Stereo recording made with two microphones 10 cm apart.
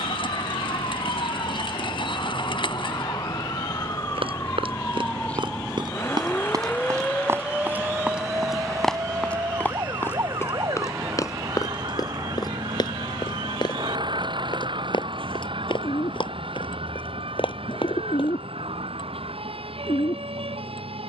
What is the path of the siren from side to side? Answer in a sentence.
You can hear the siren travel towards the right.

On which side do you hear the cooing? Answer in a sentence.
In this clip you hear the cooing on the left.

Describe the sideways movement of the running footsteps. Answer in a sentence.
In this clip you hear the running footsteps move from right to left.